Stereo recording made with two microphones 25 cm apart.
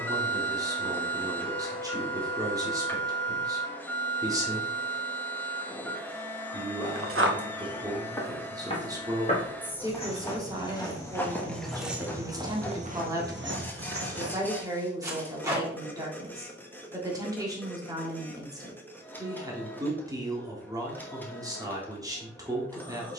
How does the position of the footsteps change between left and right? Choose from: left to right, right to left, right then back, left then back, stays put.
left then back.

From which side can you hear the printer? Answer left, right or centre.
centre.